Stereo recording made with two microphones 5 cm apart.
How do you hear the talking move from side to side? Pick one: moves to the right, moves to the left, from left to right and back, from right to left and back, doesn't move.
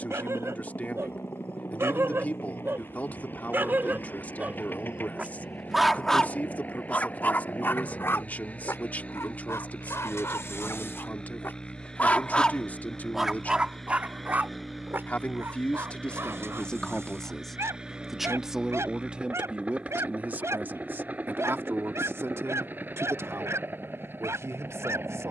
moves to the right.